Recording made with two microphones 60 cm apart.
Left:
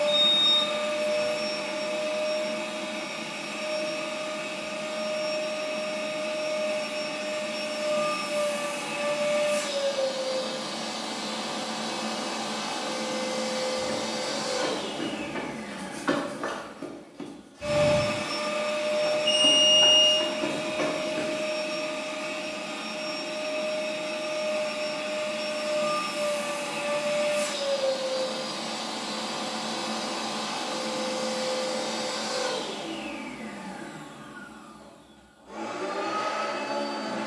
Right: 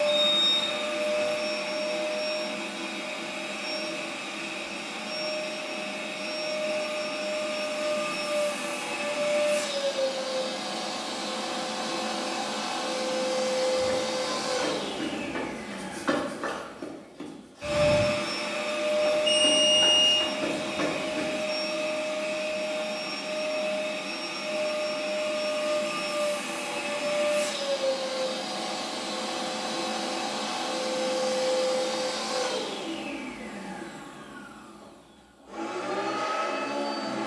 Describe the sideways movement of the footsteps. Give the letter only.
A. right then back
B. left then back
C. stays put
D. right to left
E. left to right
B.